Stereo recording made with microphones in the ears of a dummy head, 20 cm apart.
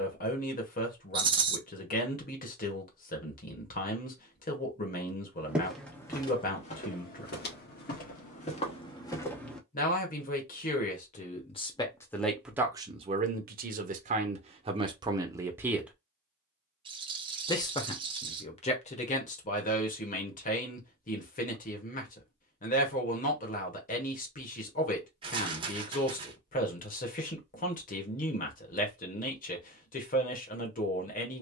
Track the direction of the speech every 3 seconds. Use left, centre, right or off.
left, left, left, left, right, centre, left, left, left, left, left.